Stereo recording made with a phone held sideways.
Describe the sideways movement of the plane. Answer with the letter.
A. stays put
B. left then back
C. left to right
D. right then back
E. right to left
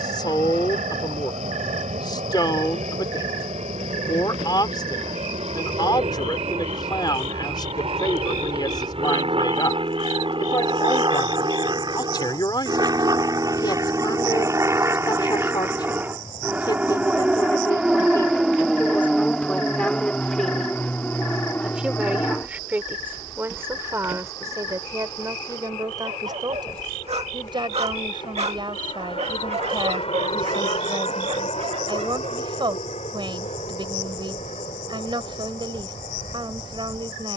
E.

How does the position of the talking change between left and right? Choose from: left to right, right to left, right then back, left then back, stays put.
left to right.